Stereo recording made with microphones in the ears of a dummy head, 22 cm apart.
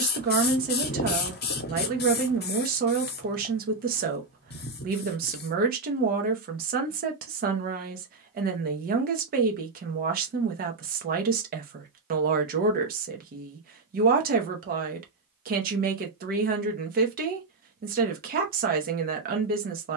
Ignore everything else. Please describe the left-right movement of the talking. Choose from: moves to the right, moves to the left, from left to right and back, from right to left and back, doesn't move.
doesn't move.